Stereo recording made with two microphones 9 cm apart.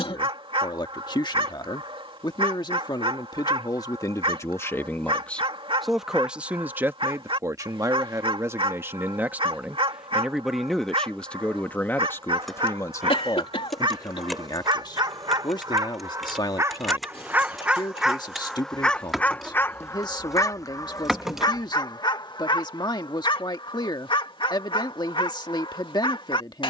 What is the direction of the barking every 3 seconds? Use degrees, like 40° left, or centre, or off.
60° right, 60° right, 60° right, 60° right, 60° right, 30° right, 20° left, 50° left, 60° left.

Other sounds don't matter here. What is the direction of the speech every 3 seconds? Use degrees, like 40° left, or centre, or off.
50° left, 30° left, 20° right, centre, 40° left, 50° left, 50° left, 50° left, 50° left.